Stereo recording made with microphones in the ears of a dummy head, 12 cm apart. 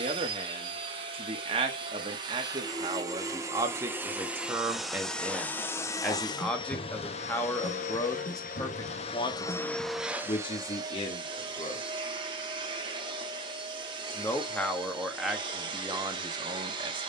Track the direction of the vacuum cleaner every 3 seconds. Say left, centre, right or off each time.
right, centre, left, centre, right, right.